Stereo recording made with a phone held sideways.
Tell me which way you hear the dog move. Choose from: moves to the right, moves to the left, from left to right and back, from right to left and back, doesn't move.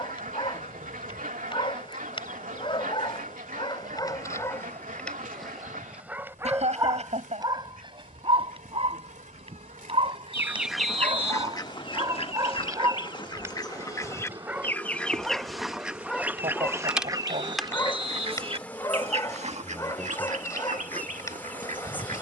from left to right and back.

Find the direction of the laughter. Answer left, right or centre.
right.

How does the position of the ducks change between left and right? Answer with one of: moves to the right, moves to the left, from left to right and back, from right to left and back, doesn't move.
from right to left and back.